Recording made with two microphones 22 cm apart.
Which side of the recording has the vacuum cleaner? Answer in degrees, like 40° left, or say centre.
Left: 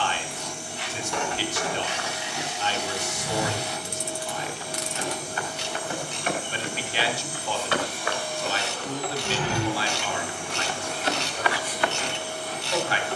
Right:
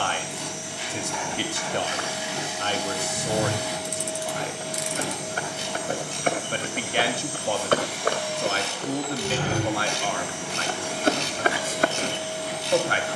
80° right.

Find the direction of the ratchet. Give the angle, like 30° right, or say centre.
70° left.